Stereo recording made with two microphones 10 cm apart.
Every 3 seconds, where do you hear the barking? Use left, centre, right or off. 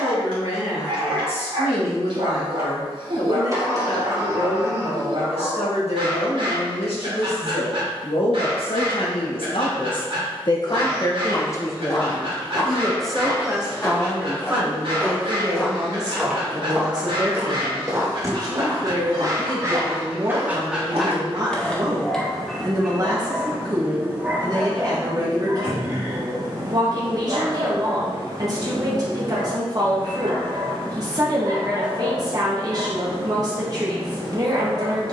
right, right, right, right, right, right, right, centre, right, right, right, right.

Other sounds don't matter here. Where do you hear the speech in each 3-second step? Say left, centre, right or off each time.
left, left, left, left, centre, right, right, right, right, right, right, right.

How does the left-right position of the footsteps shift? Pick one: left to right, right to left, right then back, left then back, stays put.
left to right.